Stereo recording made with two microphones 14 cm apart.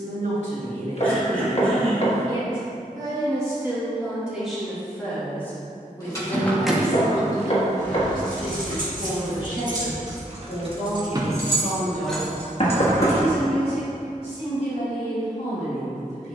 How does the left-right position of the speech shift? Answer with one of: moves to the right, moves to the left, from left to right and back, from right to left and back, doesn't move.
moves to the left.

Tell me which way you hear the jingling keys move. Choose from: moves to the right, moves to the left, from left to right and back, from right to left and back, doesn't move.
from left to right and back.